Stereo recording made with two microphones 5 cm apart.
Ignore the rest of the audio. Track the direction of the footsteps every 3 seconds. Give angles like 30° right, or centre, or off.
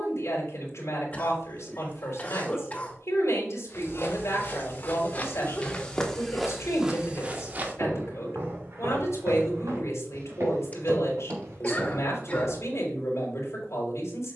off, 40° left, 30° right, 70° right, 80° right.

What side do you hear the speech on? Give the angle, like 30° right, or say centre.
70° left.